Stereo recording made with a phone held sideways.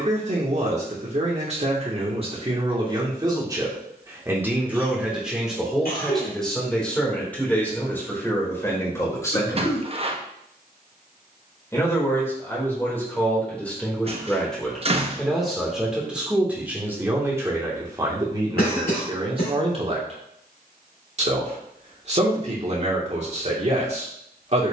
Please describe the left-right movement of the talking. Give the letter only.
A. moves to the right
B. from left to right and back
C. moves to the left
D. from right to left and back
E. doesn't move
D.